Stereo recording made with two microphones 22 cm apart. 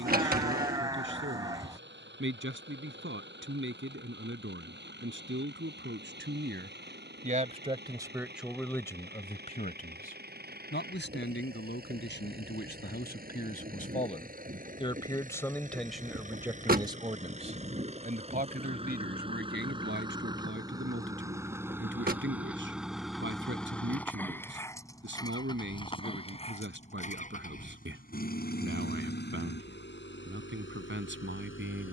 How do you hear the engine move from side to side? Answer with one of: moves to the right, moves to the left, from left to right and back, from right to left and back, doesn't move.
moves to the left.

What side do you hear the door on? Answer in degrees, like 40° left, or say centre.
40° right.